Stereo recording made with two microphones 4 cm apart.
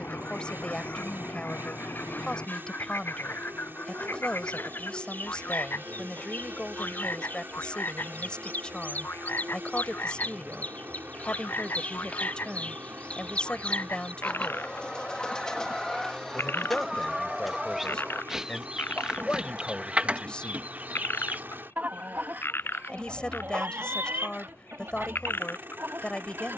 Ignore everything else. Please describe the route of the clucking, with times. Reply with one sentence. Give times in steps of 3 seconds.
You can hear the clucking on the left from 0 s, in the centre from 15 s and on the right from 18 s.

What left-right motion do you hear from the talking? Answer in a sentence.
In this clip you hear the talking stay put.